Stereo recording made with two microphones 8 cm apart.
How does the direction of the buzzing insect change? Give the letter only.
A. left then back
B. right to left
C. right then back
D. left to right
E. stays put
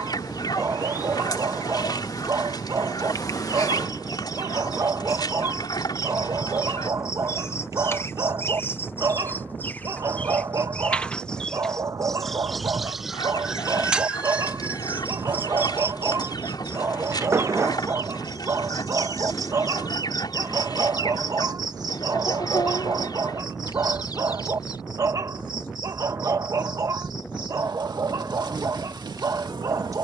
D.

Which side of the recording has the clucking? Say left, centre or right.
left.